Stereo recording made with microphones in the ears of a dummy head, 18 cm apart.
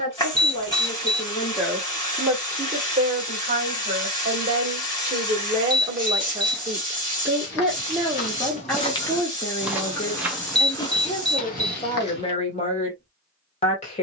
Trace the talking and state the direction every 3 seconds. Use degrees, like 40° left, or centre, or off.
centre, 30° right, 10° right, 20° left, 30° left.